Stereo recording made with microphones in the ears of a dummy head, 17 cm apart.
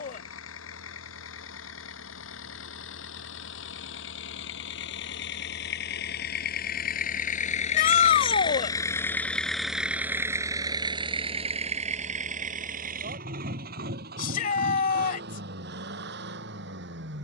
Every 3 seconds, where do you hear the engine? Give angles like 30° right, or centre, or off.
80° left, 70° left, 40° left, 20° right, 50° right, 60° right.